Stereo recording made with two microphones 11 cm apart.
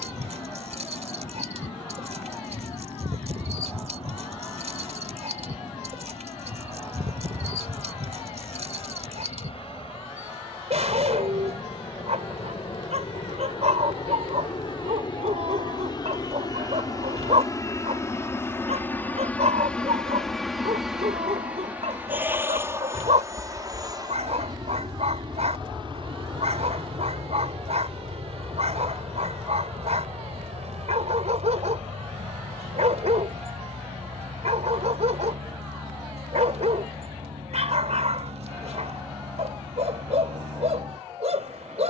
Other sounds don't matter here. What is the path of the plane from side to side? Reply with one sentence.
In this clip you hear the plane go from the left side to the right.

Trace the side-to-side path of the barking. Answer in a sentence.
In this clip you hear the barking stay in one place.